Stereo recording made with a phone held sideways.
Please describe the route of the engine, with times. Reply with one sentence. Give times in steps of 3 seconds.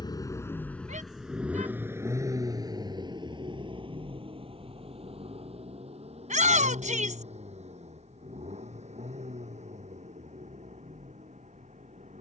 You can hear the engine in the centre from 0 s and on the right from 3 s.